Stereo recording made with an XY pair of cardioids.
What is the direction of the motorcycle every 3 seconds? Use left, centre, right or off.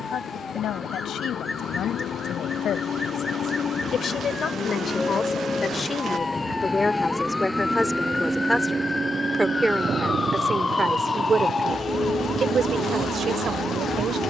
left, left, centre, right, right.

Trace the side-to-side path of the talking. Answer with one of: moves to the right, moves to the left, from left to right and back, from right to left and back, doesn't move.
moves to the right.